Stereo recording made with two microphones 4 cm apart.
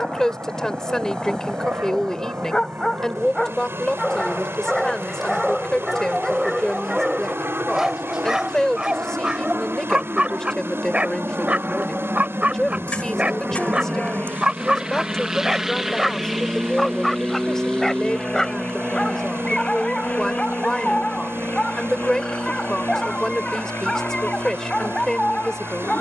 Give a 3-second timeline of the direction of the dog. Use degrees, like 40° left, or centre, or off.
20° left, 10° left, 10° right, 30° right, 30° right, centre, 20° left, 20° left, 20° left.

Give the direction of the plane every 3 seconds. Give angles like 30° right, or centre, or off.
70° right, 60° right, 60° right, 40° right, 30° right, centre, 30° left, 40° left, 50° left.